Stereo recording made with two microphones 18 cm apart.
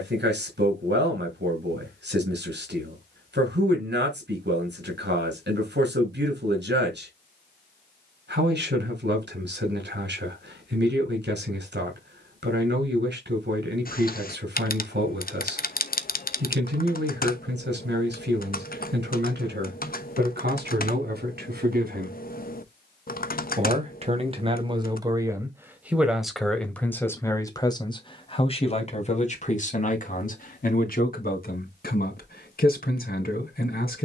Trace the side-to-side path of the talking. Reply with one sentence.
In this clip you hear the talking move from right to left.